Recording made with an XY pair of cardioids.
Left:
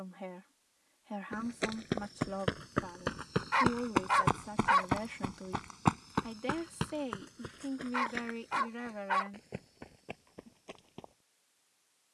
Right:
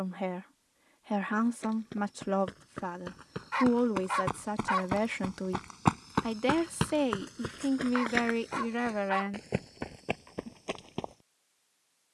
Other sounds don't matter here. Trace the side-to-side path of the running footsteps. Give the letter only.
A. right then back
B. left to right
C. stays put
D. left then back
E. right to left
B.